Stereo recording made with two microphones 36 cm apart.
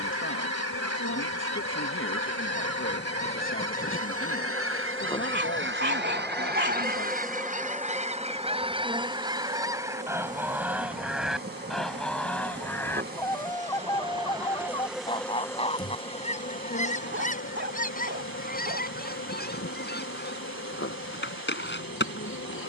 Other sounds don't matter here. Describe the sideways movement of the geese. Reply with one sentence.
You can hear the geese move from right to left.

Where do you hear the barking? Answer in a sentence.
You can hear the barking on the right.